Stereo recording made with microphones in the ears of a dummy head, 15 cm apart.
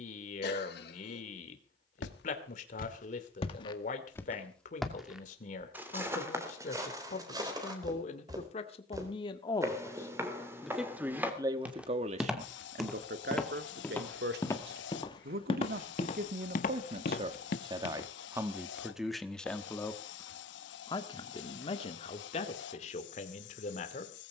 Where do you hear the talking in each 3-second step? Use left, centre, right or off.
left, left, left, centre, right, right, centre, left.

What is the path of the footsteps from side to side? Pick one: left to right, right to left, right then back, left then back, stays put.
right then back.